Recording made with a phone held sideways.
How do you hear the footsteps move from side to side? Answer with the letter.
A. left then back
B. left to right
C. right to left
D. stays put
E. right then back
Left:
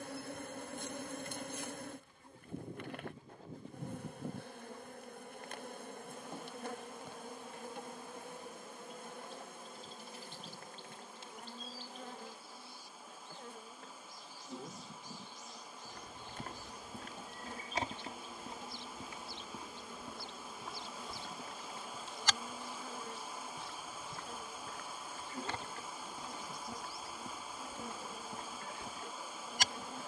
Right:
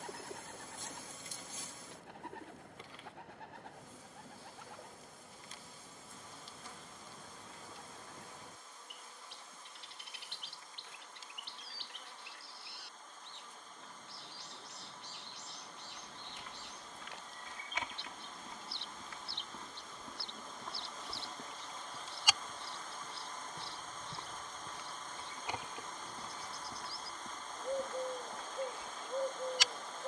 E.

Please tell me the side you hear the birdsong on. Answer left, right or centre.
right.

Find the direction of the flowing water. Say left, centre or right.
centre.